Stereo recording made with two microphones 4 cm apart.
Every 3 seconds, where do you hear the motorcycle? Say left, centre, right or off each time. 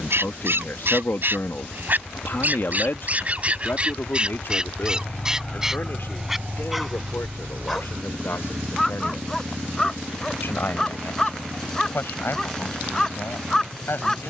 left, left, right, right, right.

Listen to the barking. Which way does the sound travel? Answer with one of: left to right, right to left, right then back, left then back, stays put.
right to left.